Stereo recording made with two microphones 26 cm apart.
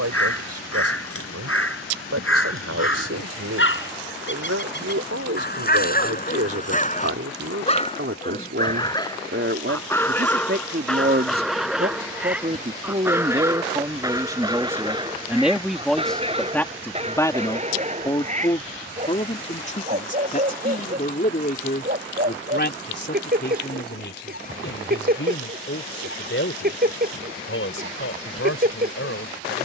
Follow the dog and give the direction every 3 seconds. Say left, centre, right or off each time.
left, left, left, centre, centre, right, right, right, right, right.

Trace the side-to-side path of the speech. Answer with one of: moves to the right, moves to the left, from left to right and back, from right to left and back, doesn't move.
moves to the left.